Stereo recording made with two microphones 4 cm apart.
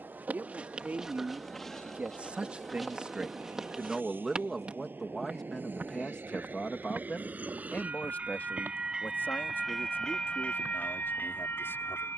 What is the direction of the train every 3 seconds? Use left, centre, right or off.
right, right, right, left.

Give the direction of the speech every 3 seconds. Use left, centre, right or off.
right, centre, left, left.